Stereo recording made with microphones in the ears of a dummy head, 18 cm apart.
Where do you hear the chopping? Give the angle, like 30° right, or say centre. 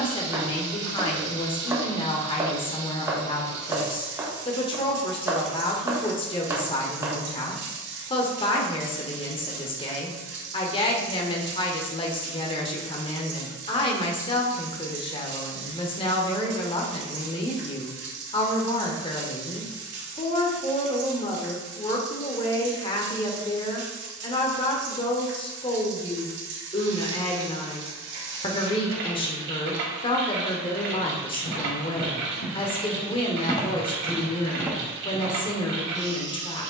10° right.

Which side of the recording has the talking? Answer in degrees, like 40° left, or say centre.
30° left.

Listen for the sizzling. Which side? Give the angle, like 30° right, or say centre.
60° right.